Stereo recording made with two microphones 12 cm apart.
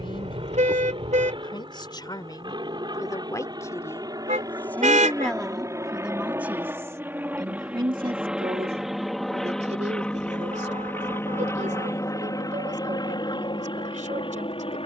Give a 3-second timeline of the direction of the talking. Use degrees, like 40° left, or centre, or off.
40° left, 10° left, 30° right, 70° right, 80° right.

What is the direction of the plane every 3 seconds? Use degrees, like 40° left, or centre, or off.
40° right, 30° right, 10° right, 10° left, 40° left.